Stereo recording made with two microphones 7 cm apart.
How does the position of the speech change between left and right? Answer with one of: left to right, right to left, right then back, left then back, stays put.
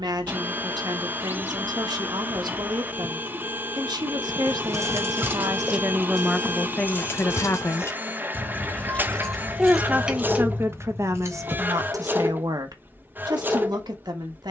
left then back.